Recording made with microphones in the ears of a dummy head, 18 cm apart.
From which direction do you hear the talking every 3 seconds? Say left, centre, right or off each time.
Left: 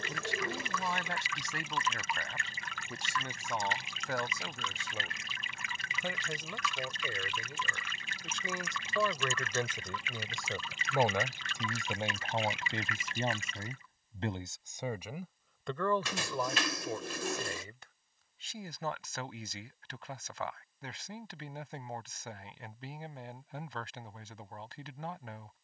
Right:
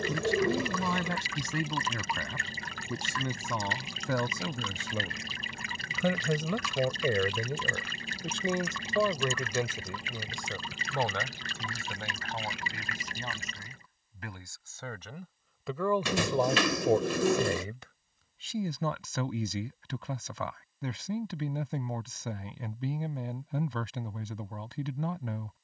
right, right, right, centre, left, right, right, right, right.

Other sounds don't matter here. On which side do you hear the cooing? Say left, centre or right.
right.